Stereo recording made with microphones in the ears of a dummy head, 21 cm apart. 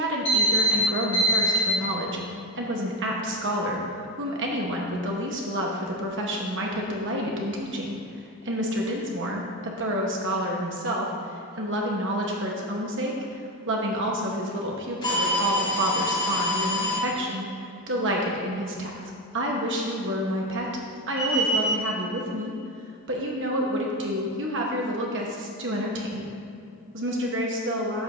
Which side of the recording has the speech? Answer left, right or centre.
right.